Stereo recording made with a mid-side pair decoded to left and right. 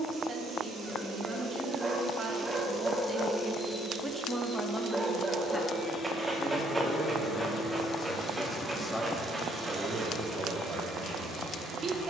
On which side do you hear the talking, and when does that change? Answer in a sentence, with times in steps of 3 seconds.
You can hear the talking on the right from 0 s, in the centre from 3 s, on the left from 6 s and on the right from 9 s.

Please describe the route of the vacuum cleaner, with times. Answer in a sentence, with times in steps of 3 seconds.
In this clip you hear the vacuum cleaner on the right from 0 s, on the left from 3 s and on the right from 9 s.